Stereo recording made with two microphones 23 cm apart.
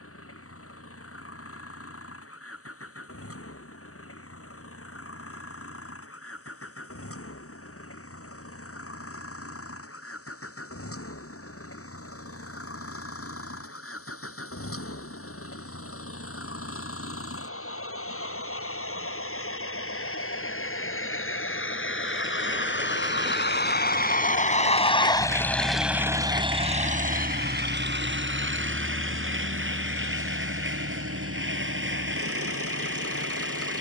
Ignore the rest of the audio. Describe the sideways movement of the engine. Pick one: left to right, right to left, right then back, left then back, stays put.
left to right.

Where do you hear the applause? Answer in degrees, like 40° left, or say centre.
60° right.